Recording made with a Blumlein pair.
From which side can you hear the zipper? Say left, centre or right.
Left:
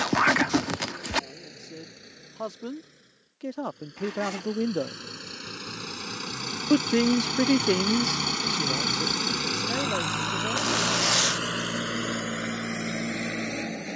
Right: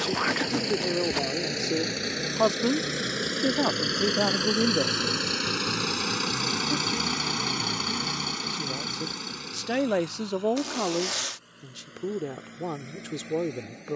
left.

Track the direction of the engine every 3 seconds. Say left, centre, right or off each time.
right, right, centre, left, left.